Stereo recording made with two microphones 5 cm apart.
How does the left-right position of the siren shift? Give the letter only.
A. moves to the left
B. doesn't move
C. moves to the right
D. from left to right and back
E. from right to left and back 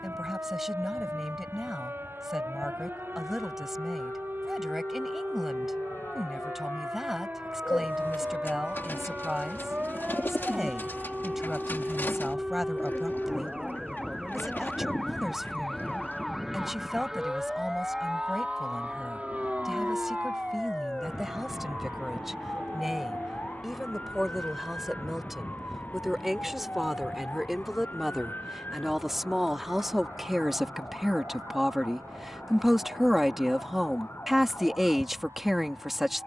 A.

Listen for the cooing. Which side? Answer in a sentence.
In this clip you hear the cooing on the left.